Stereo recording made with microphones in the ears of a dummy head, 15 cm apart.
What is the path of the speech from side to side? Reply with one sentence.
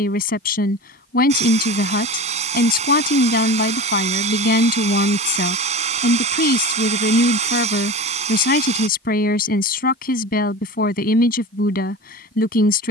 In this clip you hear the speech stay put.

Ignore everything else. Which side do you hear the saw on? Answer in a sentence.
You can hear the saw on the right.